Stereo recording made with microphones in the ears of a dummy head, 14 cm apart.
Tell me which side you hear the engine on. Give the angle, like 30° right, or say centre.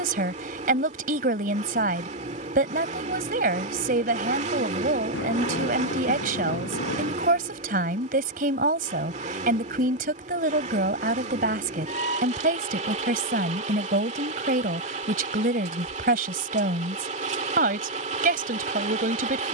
40° right.